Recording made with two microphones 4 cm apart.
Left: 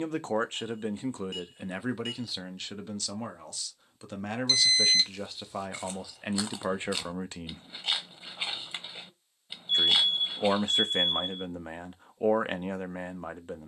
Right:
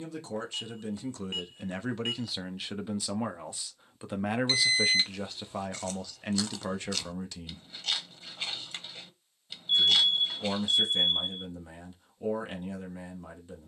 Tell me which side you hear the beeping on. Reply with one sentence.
In this clip you hear the beeping on the right.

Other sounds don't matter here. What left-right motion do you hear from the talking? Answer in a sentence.
You can hear the talking move from left to right and back again.